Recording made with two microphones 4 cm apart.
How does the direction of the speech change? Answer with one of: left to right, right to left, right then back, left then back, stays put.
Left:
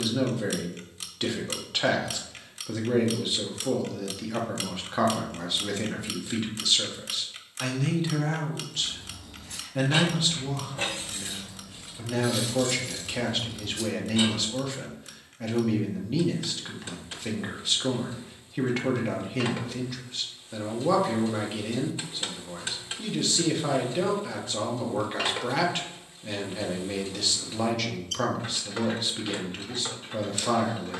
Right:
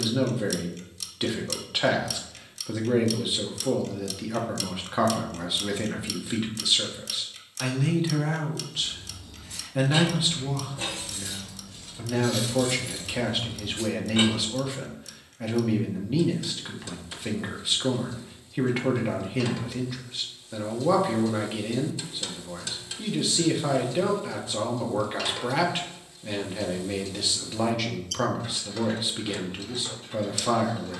stays put.